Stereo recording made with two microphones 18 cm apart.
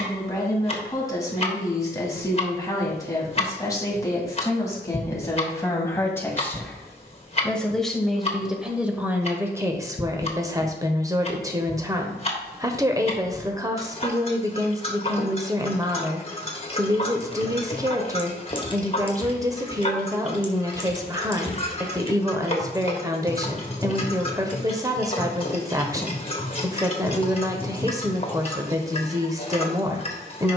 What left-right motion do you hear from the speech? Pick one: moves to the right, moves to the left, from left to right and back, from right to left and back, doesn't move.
moves to the right.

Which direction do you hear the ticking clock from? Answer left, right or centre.
left.